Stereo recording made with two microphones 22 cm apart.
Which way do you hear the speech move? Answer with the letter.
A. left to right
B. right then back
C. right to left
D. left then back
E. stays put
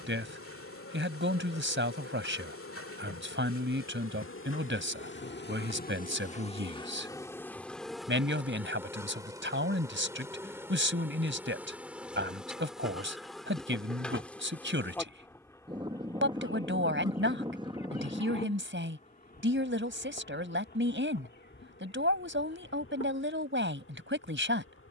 E.